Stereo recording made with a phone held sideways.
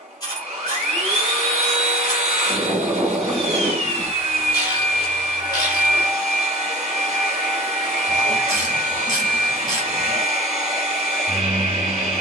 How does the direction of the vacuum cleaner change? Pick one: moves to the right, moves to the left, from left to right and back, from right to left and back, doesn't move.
doesn't move.